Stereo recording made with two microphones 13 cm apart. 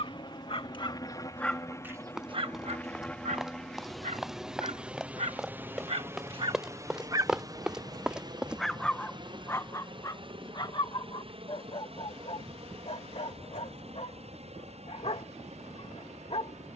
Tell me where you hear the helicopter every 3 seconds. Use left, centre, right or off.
left, centre, right, right, right, right.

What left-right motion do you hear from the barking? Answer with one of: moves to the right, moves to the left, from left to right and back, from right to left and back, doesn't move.
from left to right and back.